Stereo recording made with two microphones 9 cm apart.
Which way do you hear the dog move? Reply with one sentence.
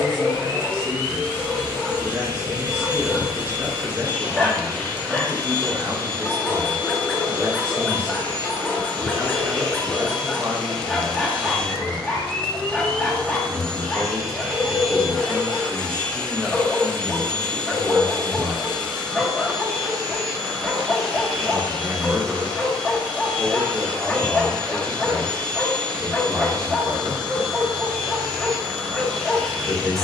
You can hear the dog stay put.